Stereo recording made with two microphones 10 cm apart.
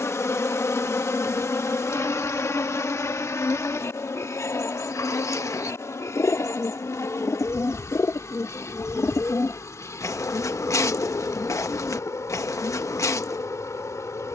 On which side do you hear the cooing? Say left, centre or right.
left.